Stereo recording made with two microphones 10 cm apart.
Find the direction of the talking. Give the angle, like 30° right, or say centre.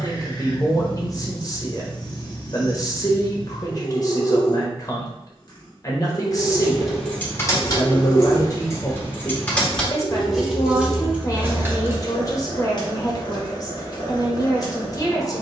40° left.